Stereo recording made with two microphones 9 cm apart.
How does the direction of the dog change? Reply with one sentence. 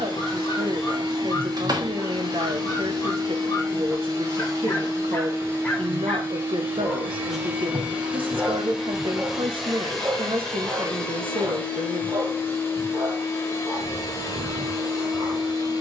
In this clip you hear the dog travel towards the right.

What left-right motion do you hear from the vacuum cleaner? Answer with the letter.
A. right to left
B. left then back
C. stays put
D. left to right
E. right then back
A.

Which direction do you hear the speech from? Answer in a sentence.
In this clip you hear the speech on the right.